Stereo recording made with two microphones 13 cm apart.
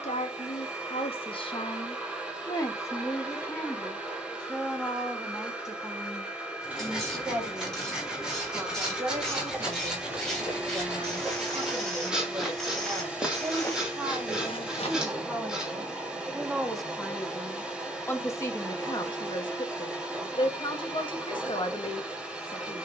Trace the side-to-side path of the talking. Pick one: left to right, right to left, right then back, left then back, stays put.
right then back.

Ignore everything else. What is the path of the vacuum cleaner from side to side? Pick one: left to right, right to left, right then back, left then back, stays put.
stays put.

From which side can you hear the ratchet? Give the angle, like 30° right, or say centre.
10° left.